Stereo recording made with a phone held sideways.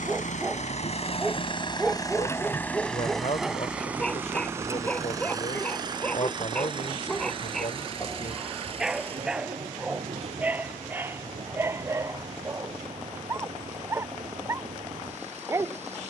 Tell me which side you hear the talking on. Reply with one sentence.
In this clip you hear the talking on the left.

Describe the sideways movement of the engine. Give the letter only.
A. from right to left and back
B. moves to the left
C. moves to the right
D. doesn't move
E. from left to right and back
C.